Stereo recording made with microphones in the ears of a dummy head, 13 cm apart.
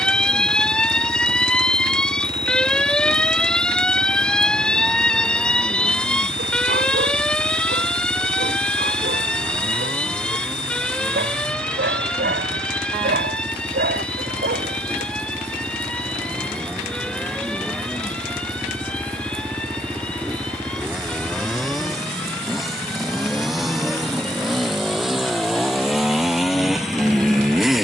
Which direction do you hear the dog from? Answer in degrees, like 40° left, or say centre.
80° right.